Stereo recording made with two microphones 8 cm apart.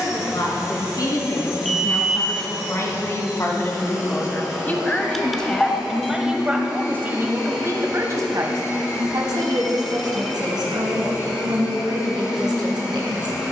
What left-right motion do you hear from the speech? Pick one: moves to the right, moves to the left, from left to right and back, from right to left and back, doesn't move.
moves to the right.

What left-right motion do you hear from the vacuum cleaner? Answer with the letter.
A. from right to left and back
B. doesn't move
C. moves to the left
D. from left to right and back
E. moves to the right
B.